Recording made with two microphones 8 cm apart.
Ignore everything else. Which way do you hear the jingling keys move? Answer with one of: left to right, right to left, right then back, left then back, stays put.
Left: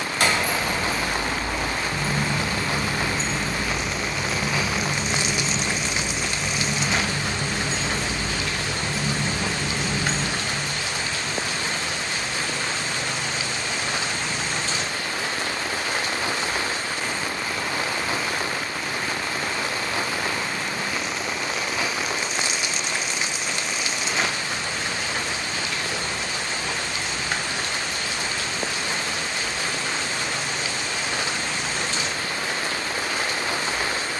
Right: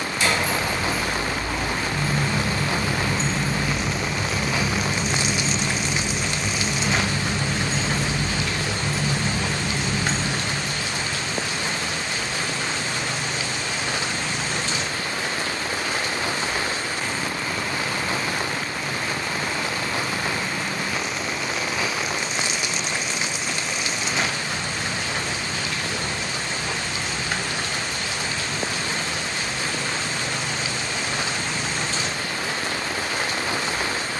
right then back.